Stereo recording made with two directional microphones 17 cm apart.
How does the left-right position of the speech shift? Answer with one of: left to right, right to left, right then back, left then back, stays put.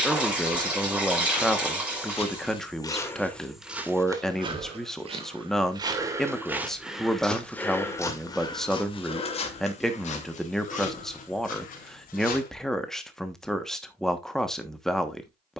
stays put.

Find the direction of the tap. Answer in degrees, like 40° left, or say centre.
10° right.